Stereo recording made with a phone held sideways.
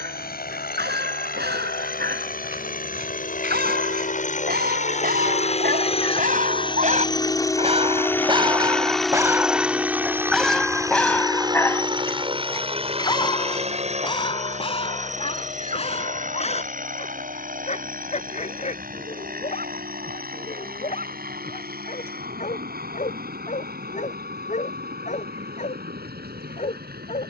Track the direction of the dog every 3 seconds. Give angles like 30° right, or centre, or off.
80° right, 70° right, 40° right, centre, 30° left, 40° left, 50° left, 50° left, 50° left.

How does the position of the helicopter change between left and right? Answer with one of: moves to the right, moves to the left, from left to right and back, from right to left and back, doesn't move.
moves to the right.